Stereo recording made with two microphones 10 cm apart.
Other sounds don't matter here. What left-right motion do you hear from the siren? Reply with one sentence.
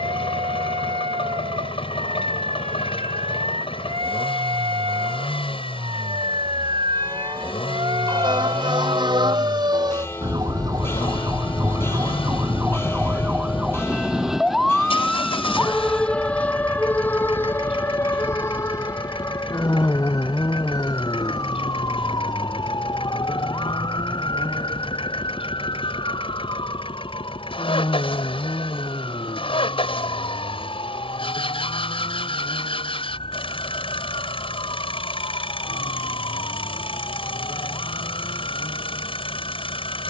You can hear the siren travel towards the left.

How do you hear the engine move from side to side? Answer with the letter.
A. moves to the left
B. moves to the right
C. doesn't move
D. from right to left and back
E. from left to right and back
C.